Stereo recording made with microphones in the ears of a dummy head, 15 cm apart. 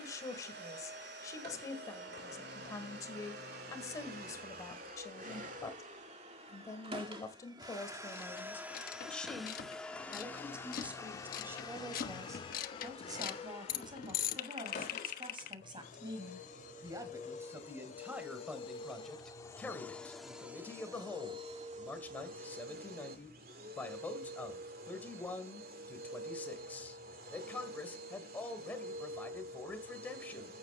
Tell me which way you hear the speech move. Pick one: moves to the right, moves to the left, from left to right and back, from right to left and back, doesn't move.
from left to right and back.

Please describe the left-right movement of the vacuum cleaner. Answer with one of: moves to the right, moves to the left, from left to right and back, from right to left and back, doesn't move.
from right to left and back.